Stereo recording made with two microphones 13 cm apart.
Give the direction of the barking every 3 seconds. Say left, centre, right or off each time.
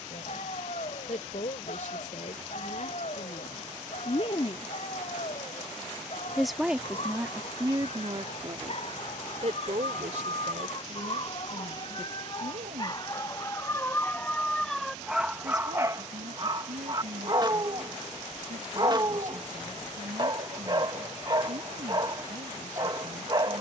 left, left, left, left, left, right, right, right.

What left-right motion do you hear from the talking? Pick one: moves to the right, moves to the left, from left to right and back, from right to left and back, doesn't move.
moves to the right.